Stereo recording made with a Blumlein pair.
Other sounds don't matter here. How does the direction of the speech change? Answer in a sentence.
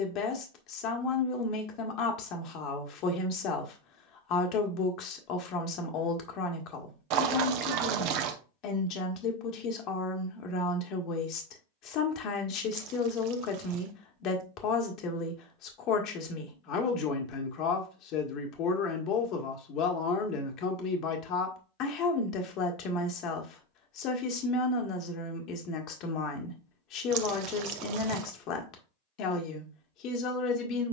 In this clip you hear the speech stay in one place.